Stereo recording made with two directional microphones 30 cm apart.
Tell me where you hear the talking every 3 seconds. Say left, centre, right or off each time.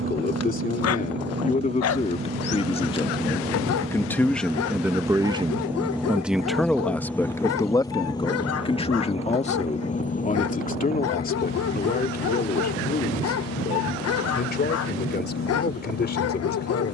left, centre, centre, left, left, left.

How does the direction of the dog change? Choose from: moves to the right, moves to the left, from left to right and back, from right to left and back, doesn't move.
doesn't move.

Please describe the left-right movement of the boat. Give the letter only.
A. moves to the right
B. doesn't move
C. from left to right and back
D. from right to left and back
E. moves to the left
E.